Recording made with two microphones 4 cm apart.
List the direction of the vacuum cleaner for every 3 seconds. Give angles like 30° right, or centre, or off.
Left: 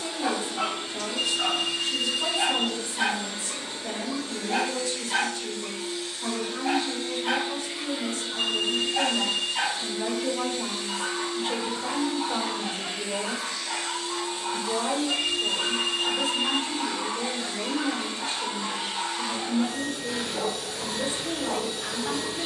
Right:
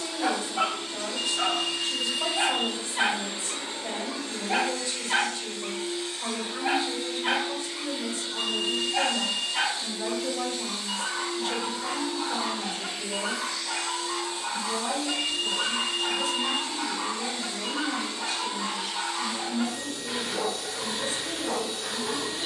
10° left, 40° right, 10° left, 30° left, 30° left, 30° left, 30° left, 30° left.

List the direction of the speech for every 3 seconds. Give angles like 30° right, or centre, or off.
30° right, 30° right, 20° right, 20° left, 40° left, 50° left, 50° left, 50° left.